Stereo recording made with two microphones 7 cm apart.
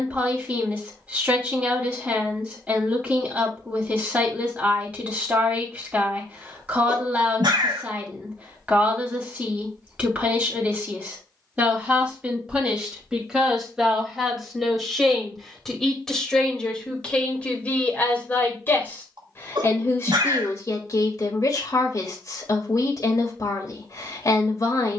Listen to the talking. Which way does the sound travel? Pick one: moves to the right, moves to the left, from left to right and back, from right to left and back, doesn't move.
moves to the left.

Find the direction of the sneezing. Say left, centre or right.
right.